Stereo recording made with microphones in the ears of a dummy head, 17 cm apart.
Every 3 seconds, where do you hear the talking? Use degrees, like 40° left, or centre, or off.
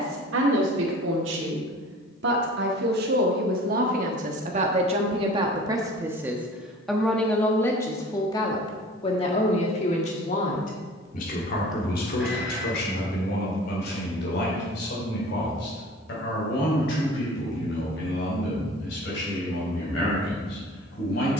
60° right, 40° right, 10° left, 40° left, 50° left, 60° left, 60° left.